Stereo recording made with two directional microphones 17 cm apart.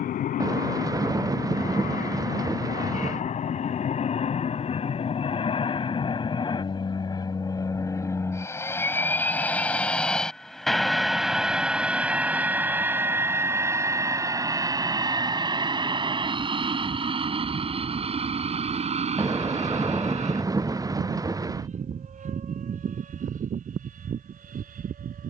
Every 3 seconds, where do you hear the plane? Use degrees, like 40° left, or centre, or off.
50° left, 40° left, 20° left, centre, 10° right, 30° right, 40° right, 40° right, 50° right.